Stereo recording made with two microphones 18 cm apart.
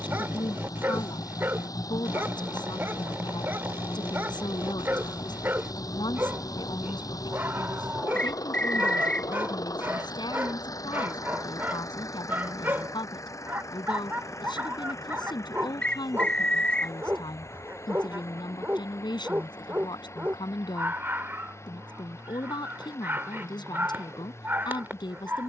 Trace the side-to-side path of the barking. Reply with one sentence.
In this clip you hear the barking stay put.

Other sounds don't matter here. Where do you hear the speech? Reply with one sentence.
In this clip you hear the speech on the left.